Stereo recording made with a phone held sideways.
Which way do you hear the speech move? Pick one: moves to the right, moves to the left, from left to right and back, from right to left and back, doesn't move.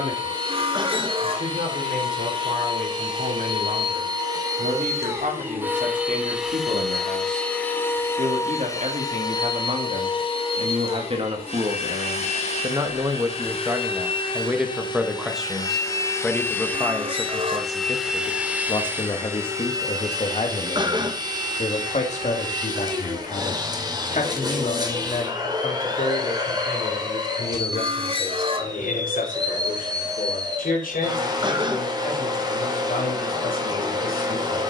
moves to the left.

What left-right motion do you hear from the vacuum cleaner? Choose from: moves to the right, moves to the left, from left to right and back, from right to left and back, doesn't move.
from right to left and back.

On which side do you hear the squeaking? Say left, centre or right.
right.